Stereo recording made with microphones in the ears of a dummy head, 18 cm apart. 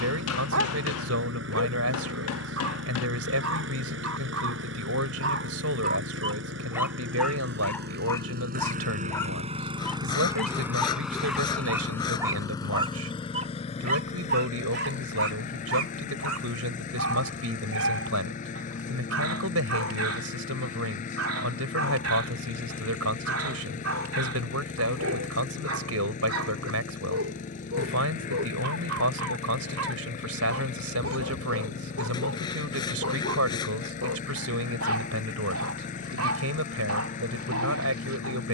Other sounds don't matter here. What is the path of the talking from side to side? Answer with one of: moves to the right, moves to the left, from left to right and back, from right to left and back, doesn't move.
doesn't move.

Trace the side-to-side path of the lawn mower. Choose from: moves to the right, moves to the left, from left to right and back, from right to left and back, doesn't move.
moves to the left.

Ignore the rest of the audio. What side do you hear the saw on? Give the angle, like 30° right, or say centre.
20° left.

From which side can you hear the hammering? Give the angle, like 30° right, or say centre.
80° left.